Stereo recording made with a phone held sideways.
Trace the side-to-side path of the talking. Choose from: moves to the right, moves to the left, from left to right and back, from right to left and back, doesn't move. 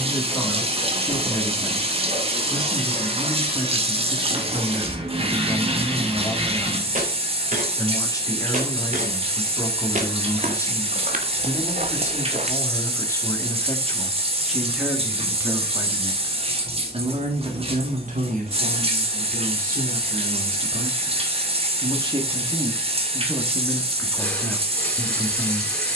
from left to right and back.